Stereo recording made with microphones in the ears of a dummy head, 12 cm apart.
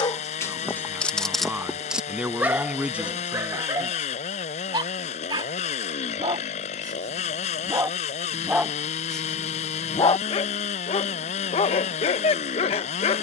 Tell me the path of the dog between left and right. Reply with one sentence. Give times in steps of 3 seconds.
In this clip you hear the dog in the centre from 0 s, on the right from 3 s and on the left from 9 s.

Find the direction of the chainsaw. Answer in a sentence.
You can hear the chainsaw on the left.